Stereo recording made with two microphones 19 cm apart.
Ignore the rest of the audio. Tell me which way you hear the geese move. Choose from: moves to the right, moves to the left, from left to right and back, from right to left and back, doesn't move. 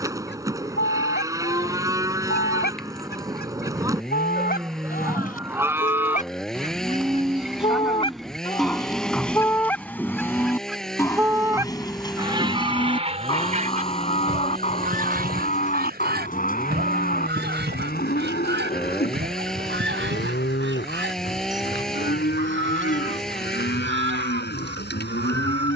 moves to the right.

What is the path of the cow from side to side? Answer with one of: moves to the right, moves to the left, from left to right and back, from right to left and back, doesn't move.
moves to the left.